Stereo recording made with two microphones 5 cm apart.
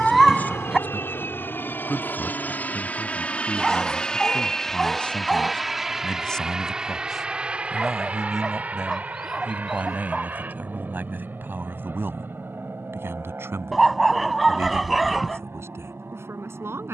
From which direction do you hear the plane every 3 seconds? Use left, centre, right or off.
left, centre, right, right, right, right.